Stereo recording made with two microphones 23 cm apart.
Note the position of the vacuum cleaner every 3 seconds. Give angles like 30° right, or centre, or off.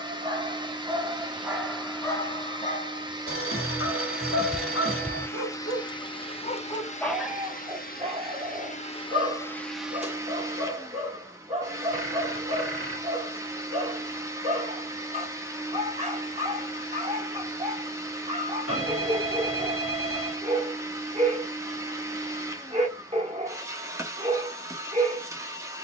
20° right, centre, 30° left, 10° right, 10° right, 10° right, 10° right, 10° right, 10° right.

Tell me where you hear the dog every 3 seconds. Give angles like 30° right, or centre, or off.
centre, 70° left, 10° right, 30° right, 30° right, 30° right, 30° right, 30° right, 30° right.